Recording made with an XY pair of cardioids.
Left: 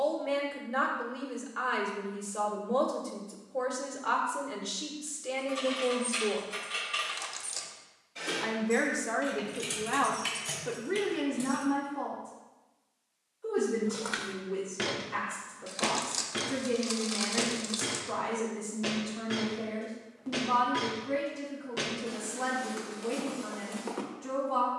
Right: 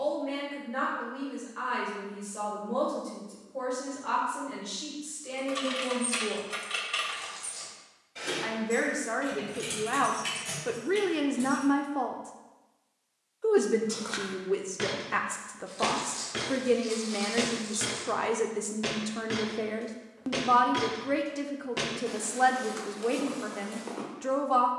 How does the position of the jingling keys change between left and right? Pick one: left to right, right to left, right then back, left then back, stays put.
right to left.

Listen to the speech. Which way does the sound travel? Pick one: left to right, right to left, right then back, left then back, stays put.
left to right.